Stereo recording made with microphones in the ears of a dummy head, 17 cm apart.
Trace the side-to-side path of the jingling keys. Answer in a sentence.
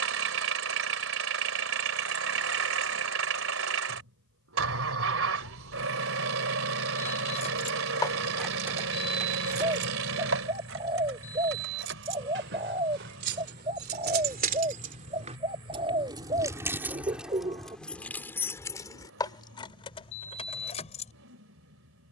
In this clip you hear the jingling keys move from left to right and back again.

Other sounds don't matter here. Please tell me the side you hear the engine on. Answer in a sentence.
You can hear the engine on the right.